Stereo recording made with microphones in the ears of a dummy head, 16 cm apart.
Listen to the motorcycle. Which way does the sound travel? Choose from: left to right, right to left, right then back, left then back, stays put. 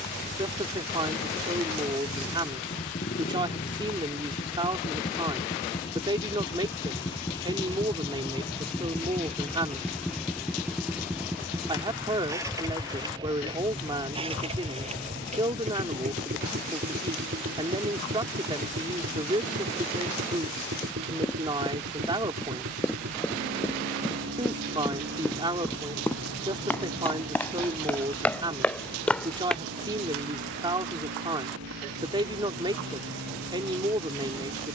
left to right.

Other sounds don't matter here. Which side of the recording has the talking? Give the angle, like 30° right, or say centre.
30° right.